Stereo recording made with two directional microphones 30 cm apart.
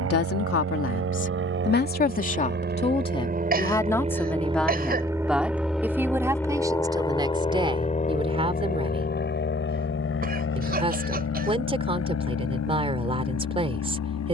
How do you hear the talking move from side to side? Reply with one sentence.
In this clip you hear the talking move to the right.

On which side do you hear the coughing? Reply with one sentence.
In this clip you hear the coughing on the right.